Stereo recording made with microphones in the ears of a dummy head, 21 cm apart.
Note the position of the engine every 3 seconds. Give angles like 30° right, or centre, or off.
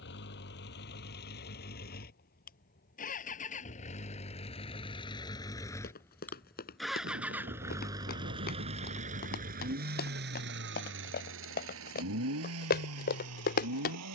40° left, 20° left, 10° right, 50° right, 70° right.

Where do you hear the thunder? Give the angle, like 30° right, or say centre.
40° right.